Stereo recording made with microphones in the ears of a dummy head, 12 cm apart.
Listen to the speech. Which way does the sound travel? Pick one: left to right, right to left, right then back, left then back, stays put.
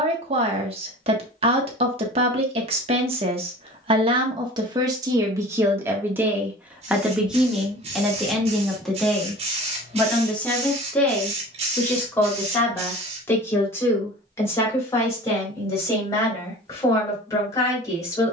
right to left.